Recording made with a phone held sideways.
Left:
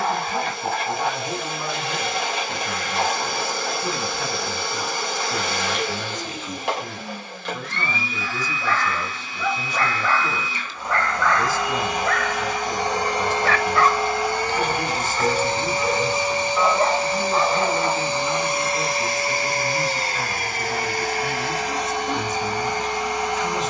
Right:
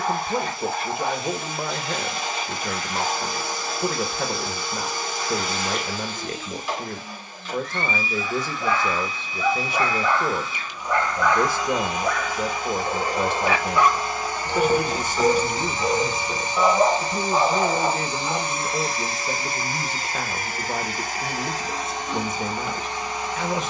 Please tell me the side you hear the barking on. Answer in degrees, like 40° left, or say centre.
20° right.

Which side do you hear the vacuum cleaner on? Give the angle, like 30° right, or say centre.
80° left.